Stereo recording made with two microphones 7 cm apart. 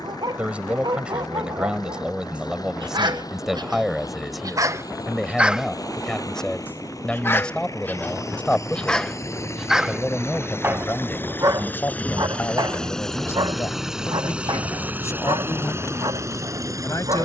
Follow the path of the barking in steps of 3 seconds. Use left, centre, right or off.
right, right, left, right, right, right.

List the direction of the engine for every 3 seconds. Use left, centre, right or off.
left, left, left, left, centre, right.